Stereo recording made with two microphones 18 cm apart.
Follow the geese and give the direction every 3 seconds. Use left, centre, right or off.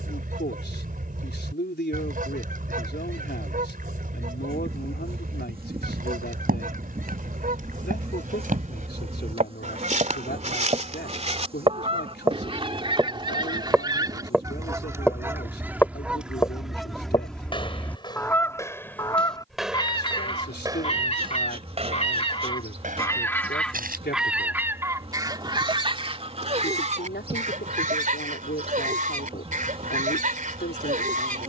right, right, right, right, right, centre, left, left, right, right, right.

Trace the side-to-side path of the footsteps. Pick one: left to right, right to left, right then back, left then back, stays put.
left then back.